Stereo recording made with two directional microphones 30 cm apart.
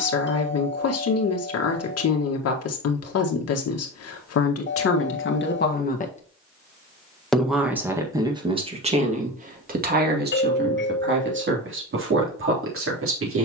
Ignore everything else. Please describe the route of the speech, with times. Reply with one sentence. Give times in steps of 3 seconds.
You can hear the speech on the left from 0 s, in the centre from 6 s and on the right from 9 s.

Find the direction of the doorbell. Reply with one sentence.
In this clip you hear the doorbell on the left.